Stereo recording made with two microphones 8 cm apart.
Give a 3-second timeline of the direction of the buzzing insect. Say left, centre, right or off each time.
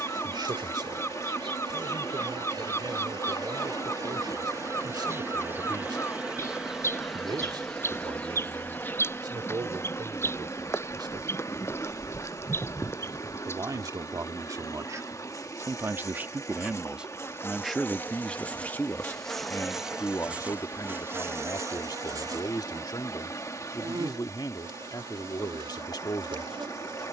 right, right, centre, left, left, left, centre, right, right.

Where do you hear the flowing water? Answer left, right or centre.
left.